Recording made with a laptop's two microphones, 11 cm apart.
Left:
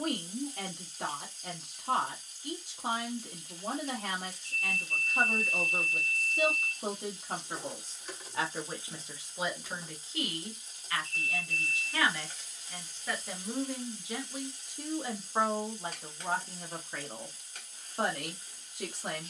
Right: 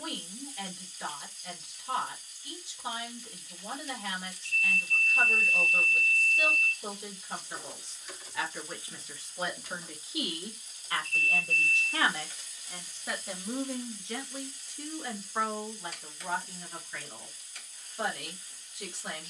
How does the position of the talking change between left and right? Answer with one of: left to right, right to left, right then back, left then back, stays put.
right then back.